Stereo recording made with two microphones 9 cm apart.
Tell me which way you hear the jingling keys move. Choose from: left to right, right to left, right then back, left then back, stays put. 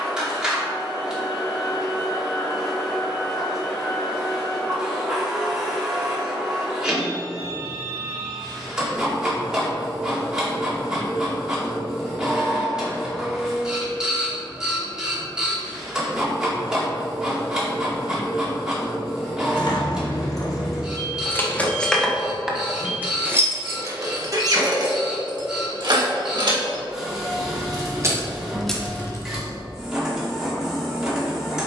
right then back.